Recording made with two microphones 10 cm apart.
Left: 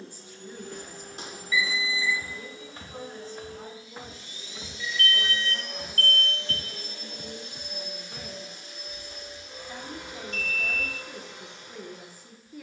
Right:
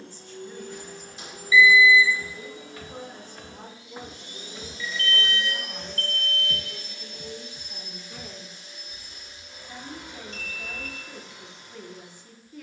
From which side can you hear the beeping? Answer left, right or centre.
left.